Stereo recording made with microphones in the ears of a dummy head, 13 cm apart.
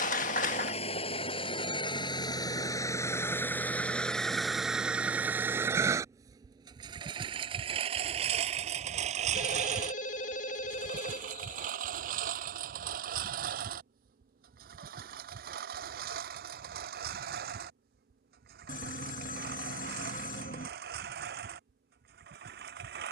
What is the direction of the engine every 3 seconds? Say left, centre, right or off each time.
left, centre, right, right, right, right, right, right.